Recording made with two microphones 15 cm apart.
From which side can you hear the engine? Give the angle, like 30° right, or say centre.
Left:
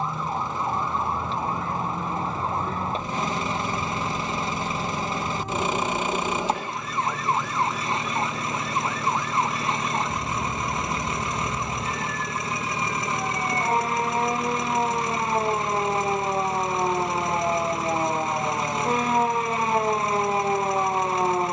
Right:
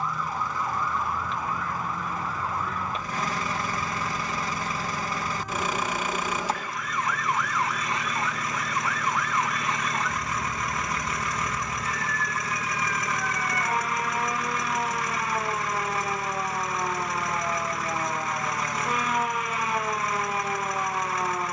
20° left.